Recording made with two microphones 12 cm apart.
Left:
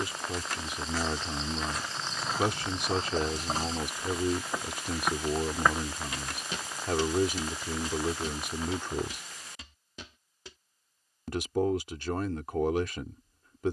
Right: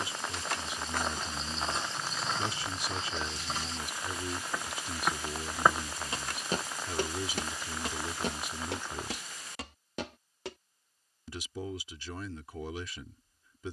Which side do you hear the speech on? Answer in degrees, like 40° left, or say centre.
60° left.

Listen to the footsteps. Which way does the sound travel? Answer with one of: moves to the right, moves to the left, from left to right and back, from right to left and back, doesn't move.
from right to left and back.